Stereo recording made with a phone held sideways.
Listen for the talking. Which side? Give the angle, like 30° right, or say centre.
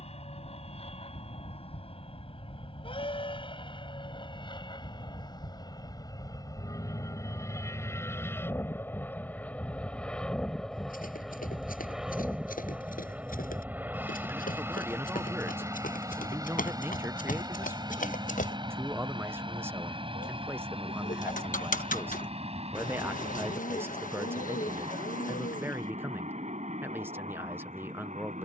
10° right.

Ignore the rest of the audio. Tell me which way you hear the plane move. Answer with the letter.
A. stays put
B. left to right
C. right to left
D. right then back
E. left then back
B.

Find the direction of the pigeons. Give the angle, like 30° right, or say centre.
70° left.